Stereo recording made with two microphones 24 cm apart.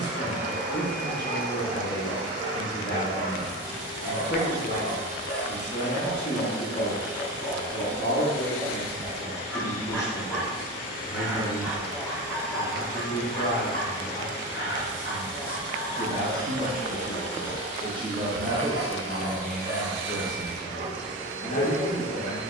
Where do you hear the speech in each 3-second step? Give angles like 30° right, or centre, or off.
40° left, 40° left, 40° left, 40° left, 40° left, 20° right, centre, 30° left.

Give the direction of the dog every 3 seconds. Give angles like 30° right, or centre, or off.
50° left, 50° left, 30° left, centre, 20° left, 40° left, 40° left, 40° left.